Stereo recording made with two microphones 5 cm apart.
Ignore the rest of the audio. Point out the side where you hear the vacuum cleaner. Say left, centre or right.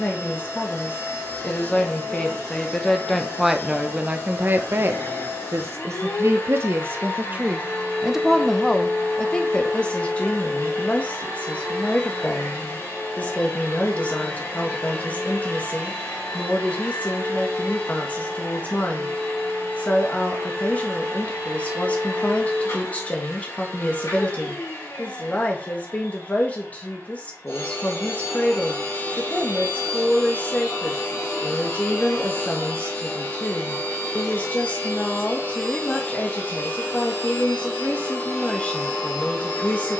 left.